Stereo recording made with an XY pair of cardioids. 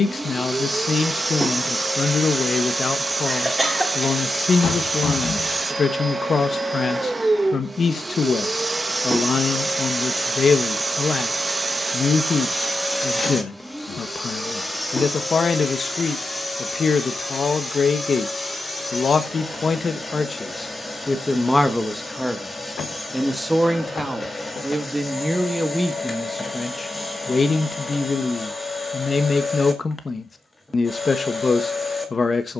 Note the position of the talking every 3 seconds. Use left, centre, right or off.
left, left, left, left, left, left, left, centre, centre, left, left.